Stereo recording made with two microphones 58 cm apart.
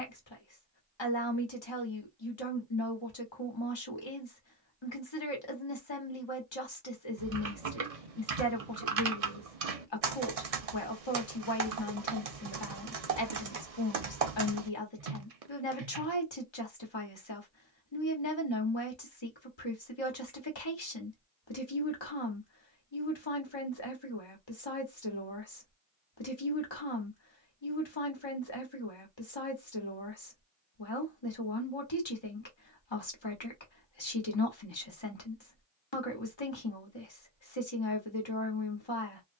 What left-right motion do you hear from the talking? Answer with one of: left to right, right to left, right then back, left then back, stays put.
stays put.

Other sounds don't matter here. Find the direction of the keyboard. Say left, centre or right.
right.